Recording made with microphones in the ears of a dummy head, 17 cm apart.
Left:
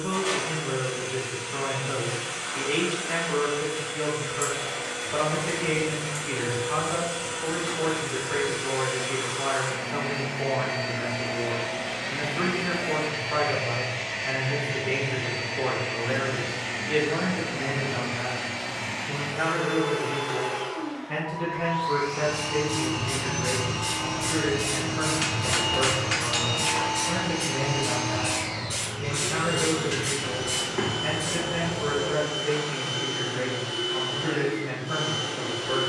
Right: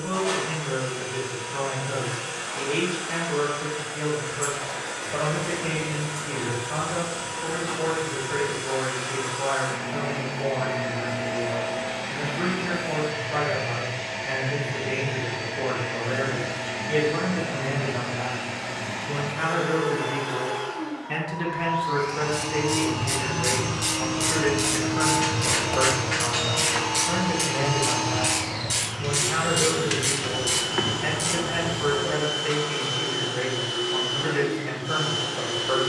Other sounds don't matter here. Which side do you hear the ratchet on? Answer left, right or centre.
right.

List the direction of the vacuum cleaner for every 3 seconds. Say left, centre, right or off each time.
left, left, left, left, left, left, left, centre, right, right, right, right.